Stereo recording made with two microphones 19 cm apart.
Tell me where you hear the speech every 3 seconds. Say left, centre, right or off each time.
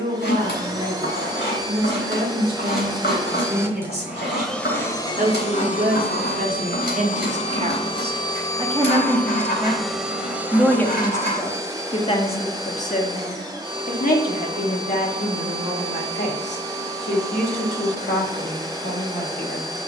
right, right, right, centre, left, left, left.